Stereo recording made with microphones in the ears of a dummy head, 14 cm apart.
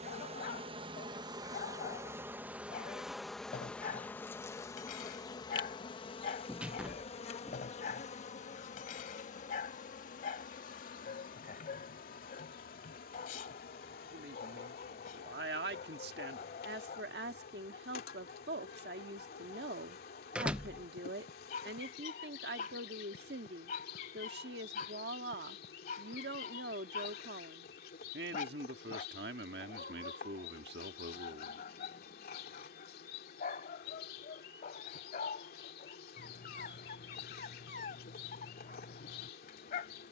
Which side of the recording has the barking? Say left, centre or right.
left.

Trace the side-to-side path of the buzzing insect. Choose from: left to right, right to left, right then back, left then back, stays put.
right to left.